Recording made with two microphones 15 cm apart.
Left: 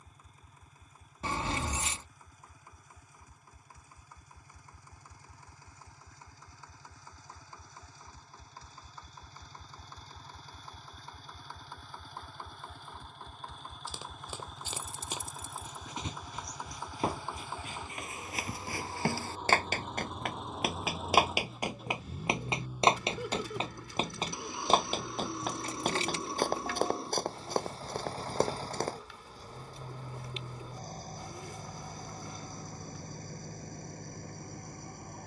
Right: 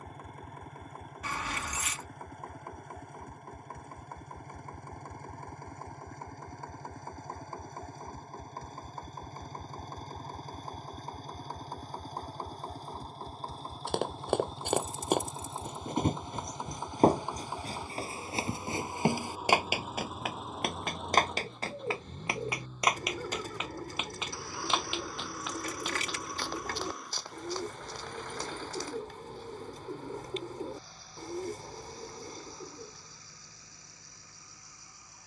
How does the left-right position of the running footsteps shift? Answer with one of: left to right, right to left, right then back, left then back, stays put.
right to left.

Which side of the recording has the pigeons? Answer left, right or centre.
right.